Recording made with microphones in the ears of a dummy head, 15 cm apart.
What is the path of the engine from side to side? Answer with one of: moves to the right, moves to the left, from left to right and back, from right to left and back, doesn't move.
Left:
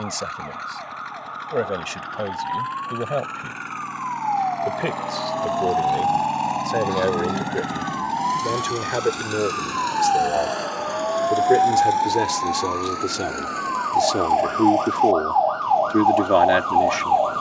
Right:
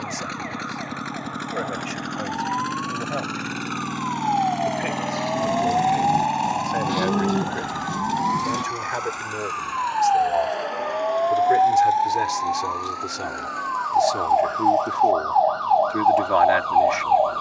moves to the left.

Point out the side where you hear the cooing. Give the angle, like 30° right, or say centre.
30° right.